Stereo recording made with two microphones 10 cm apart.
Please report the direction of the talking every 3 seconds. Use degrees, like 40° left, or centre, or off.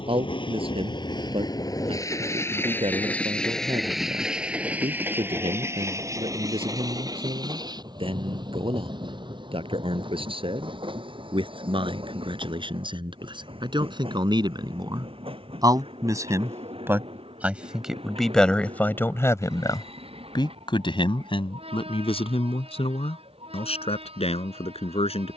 60° right, 60° right, 60° right, 60° right, 50° right, 20° right, 30° left, 70° left, 80° left.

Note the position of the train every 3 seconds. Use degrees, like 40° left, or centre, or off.
40° left, 10° right, 40° right, 50° right, 60° right, 60° right, 60° right, 70° right, 70° right.